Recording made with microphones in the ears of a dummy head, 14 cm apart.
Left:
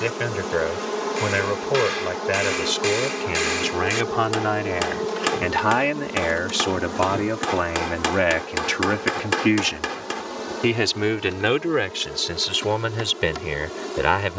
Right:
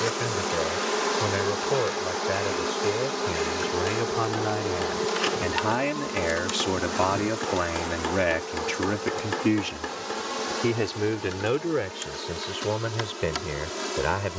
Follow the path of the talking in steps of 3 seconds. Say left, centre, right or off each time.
left, left, centre, left, left.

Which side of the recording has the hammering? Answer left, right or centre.
left.